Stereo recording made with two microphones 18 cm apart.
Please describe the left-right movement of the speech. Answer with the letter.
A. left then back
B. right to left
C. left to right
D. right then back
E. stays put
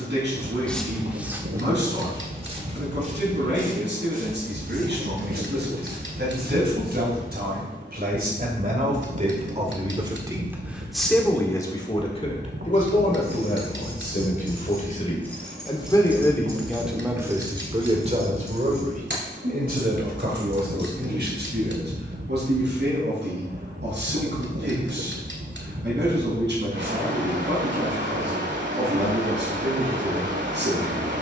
A.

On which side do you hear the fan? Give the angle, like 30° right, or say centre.
80° right.